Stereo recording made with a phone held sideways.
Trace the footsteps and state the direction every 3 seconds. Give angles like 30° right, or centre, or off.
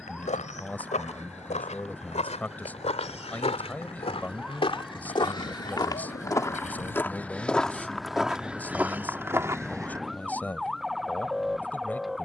60° left, 50° left, 10° left, 20° right.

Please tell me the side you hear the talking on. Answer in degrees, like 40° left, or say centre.
10° left.